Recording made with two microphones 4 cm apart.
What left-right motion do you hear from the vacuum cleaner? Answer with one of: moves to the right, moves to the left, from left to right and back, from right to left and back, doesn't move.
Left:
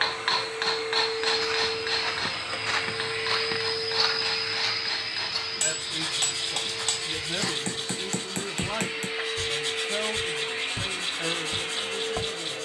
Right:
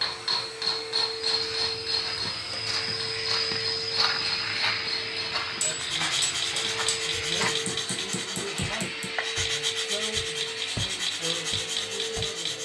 from left to right and back.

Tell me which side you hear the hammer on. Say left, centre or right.
left.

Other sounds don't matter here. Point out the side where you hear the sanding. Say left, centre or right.
right.